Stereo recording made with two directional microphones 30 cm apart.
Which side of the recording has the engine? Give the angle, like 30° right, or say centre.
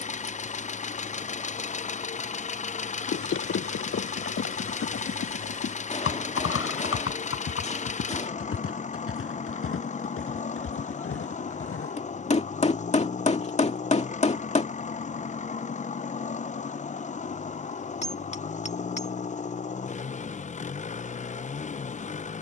20° left.